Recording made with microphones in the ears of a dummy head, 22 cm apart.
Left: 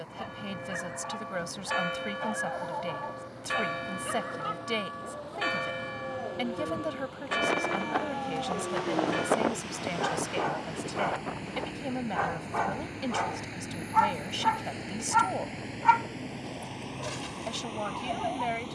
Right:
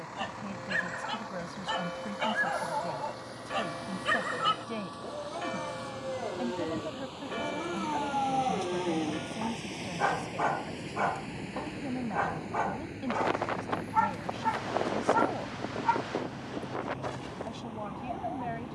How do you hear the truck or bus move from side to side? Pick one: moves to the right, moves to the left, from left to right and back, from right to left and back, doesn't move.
moves to the left.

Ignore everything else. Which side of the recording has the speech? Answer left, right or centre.
left.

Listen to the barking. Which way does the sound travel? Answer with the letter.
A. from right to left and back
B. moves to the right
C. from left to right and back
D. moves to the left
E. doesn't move
D.